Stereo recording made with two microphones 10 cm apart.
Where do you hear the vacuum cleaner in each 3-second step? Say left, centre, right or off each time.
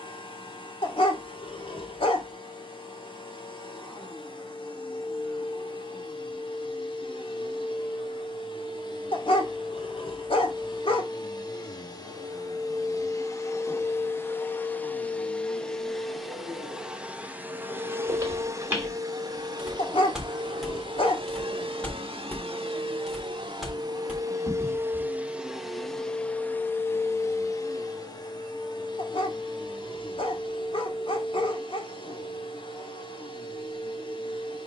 left, left, left, left, left, centre, right, right, centre, left, left, left.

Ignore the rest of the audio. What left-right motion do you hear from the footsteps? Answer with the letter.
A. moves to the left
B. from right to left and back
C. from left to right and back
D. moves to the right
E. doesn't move
B.